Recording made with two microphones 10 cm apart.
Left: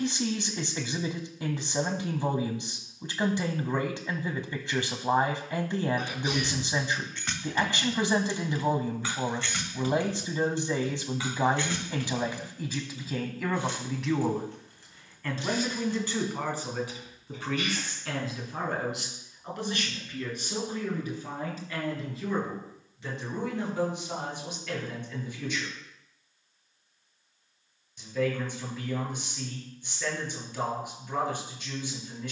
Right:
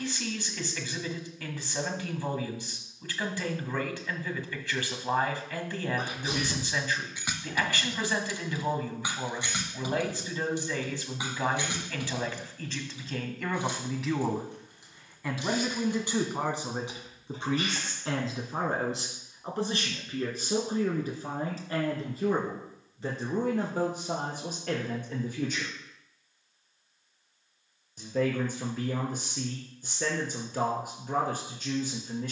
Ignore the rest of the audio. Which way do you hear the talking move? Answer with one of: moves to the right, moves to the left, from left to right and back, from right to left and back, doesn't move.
moves to the right.